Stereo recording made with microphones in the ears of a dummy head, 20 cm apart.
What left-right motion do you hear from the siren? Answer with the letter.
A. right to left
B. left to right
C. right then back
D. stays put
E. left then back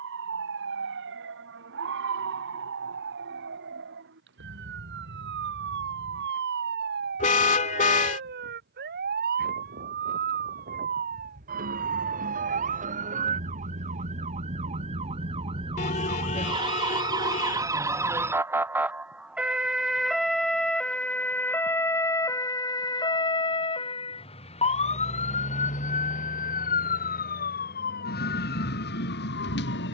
A.